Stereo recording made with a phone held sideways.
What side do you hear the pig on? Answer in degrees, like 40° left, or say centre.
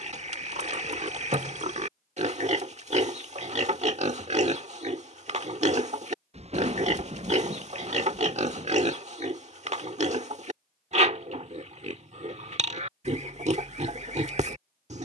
50° right.